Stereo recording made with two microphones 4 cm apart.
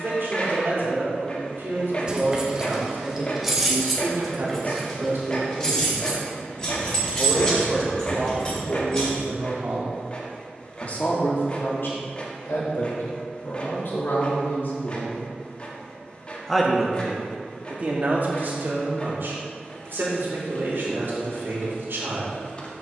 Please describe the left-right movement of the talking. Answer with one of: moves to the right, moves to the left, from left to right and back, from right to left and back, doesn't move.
from right to left and back.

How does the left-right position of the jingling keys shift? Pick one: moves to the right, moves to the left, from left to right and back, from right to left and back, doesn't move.
moves to the left.